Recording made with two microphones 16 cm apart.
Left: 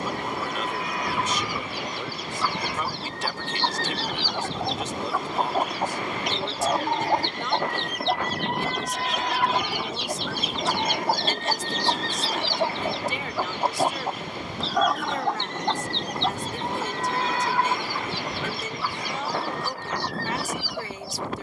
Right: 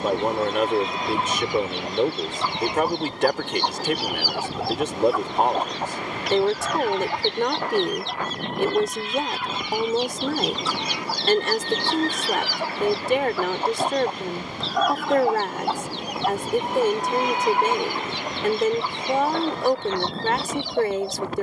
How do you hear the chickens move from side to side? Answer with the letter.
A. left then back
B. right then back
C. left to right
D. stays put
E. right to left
A.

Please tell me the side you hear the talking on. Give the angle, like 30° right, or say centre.
60° right.